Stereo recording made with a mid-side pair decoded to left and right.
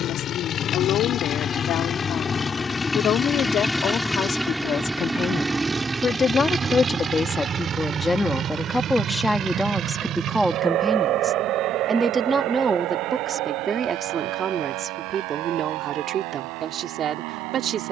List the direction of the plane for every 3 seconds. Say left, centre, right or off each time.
left, centre, right, right, right, right.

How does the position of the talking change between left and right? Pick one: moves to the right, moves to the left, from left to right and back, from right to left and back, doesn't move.
moves to the right.